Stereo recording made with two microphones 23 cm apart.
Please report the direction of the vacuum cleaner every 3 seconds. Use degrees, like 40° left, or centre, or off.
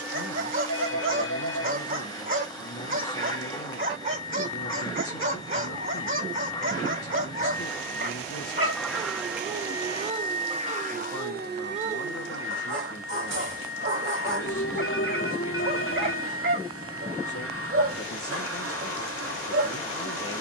20° left, 20° left, 10° left, 30° right, 70° right, 70° right, 70° right.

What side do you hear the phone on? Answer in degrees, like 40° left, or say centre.
70° left.